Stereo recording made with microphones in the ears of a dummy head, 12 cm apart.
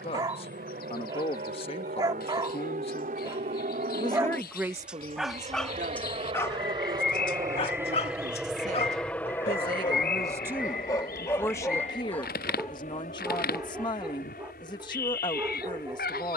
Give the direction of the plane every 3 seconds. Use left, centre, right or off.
right, right, right, left, left, left.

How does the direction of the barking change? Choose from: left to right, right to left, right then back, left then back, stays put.
left then back.